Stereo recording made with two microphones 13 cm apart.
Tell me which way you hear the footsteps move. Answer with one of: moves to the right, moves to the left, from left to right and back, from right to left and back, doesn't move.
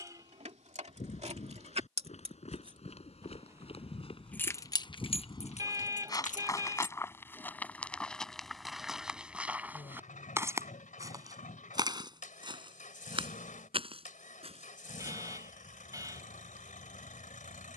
moves to the right.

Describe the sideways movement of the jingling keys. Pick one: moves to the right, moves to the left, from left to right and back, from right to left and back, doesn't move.
moves to the left.